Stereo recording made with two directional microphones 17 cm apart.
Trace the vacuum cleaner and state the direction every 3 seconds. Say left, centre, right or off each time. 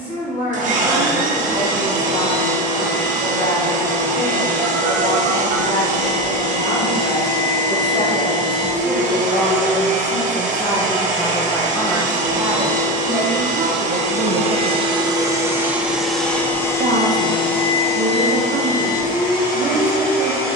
right, right, right, right, right, centre, left.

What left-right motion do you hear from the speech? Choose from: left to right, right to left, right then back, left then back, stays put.
left to right.